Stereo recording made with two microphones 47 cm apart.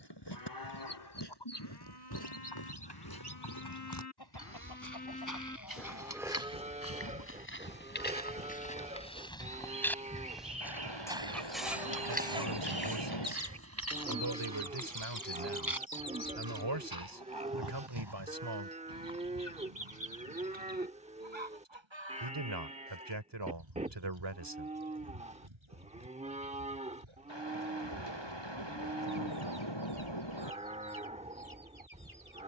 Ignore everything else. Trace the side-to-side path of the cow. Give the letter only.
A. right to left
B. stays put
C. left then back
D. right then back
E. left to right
E.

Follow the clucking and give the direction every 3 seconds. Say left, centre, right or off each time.
left, left, left, centre, right, right, right, right, right, right, right.